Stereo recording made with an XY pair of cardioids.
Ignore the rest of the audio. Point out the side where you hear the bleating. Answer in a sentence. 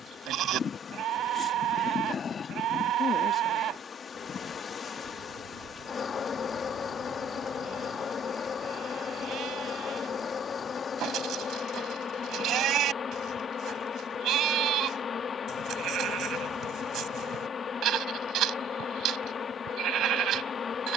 In this clip you hear the bleating on the right.